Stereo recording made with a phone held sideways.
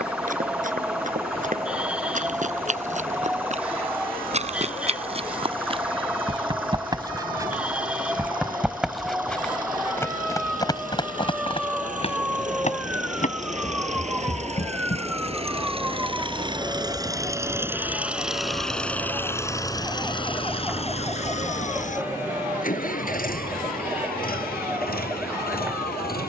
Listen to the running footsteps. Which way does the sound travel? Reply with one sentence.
You can hear the running footsteps move from right to left.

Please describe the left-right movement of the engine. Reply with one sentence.
In this clip you hear the engine move from right to left.